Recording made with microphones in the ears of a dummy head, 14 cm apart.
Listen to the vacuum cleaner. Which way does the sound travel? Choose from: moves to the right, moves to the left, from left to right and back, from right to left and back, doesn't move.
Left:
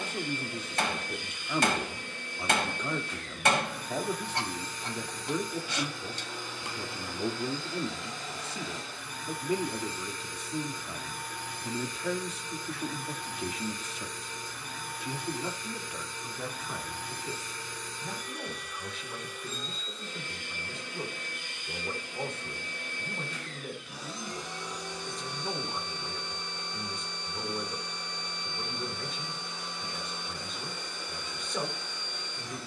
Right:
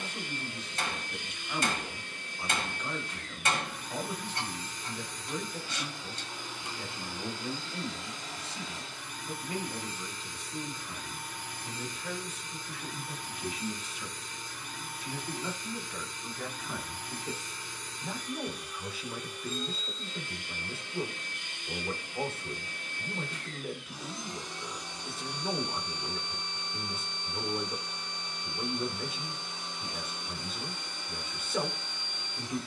doesn't move.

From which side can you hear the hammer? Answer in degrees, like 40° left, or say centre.
50° left.